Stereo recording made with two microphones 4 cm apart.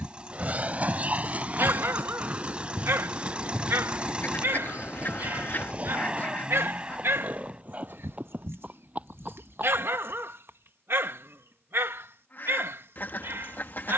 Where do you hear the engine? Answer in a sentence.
You can hear the engine on the right.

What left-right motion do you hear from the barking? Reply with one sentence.
You can hear the barking stay in one place.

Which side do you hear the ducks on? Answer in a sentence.
You can hear the ducks on the left.